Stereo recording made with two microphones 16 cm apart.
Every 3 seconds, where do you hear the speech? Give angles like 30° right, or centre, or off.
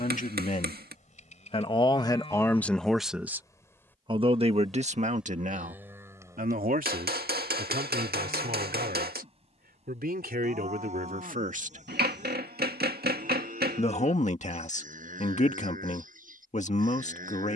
30° left, 40° right, 70° right, 70° right, 50° left, 50° left.